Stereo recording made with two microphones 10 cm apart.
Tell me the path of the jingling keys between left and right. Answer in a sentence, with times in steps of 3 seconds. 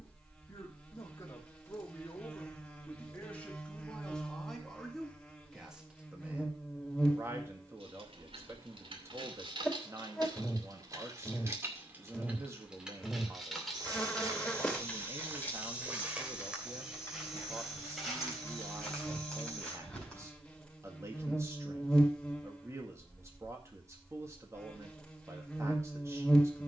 You can hear the jingling keys not at all from 0 s, on the right from 6 s, in the centre from 12 s, on the left from 15 s and not at all from 21 s.